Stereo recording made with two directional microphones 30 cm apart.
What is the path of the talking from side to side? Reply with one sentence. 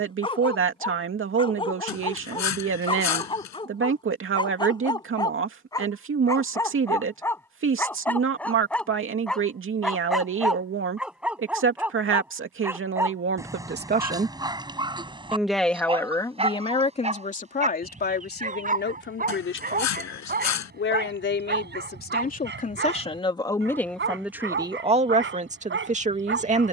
In this clip you hear the talking go left and come back.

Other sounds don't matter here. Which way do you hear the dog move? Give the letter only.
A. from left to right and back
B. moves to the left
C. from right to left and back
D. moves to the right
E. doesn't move
D.